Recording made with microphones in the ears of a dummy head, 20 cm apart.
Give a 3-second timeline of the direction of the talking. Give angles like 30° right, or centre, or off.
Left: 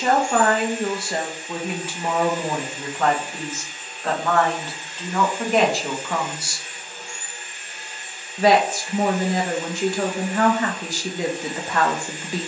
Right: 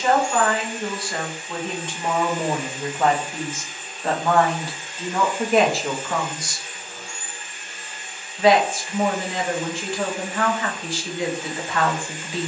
20° left, 10° right, 20° left, 40° left.